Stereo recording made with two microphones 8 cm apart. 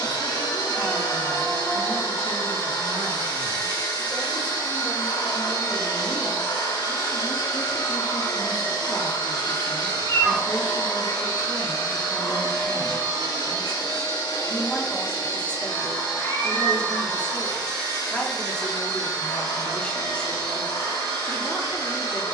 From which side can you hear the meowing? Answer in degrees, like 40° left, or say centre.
40° left.